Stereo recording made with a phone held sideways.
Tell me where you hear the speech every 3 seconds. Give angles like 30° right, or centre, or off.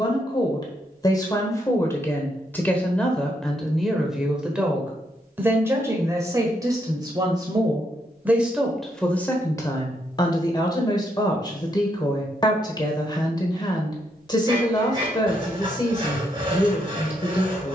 20° left, centre, 20° right, 20° left, 30° left, 30° left.